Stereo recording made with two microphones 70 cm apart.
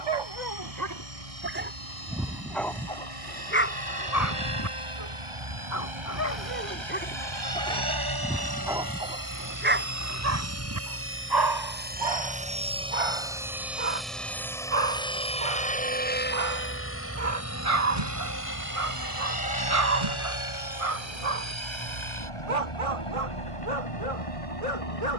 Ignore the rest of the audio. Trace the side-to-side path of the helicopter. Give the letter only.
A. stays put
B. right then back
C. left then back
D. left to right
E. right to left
E.